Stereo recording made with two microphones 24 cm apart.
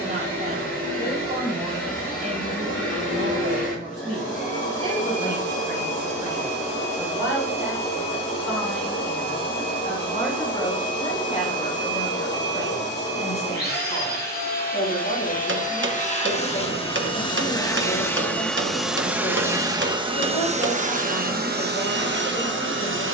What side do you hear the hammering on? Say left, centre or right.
right.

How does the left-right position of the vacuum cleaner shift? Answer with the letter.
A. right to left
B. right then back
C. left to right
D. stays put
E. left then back
C.